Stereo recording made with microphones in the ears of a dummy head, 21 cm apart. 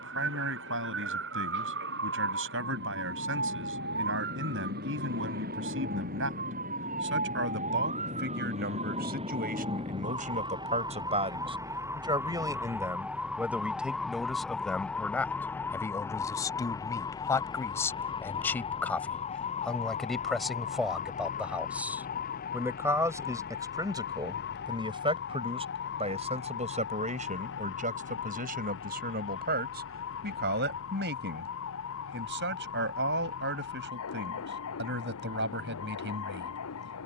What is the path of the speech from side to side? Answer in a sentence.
You can hear the speech go left and come back.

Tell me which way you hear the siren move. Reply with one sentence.
You can hear the siren move from right to left.